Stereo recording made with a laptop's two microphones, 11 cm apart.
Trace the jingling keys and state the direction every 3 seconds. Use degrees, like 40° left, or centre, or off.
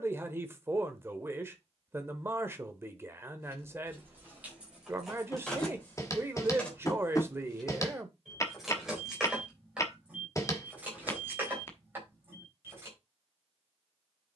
off, 10° right, centre, 10° right, 20° right.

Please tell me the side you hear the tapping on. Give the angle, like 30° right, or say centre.
30° left.